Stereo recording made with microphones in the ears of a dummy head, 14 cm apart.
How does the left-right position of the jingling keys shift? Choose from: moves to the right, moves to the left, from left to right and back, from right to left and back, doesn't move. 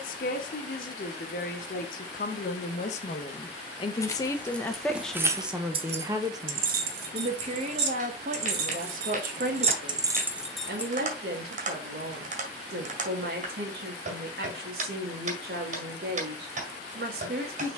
from left to right and back.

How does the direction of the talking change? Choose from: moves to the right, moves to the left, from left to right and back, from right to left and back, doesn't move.
moves to the right.